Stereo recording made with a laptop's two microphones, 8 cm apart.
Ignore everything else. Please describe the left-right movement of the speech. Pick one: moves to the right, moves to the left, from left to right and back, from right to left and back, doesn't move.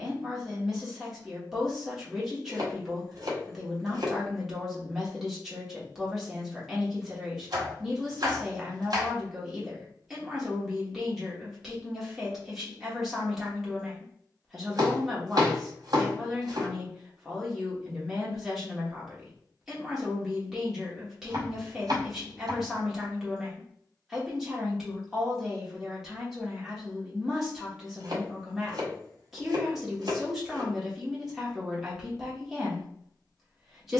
doesn't move.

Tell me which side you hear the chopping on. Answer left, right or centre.
right.